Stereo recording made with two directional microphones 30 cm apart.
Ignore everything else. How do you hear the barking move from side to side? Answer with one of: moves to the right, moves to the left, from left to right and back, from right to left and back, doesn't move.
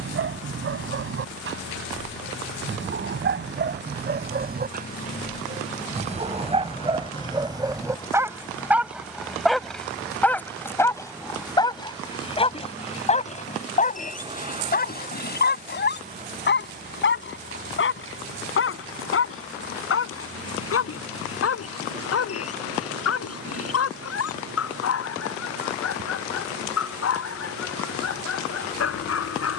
moves to the left.